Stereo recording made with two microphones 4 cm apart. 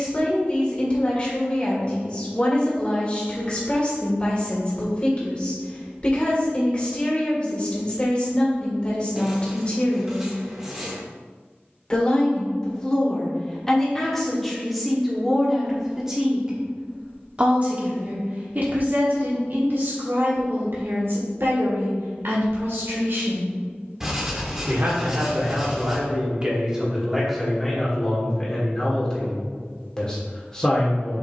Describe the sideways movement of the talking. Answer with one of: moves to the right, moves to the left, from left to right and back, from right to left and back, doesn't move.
from left to right and back.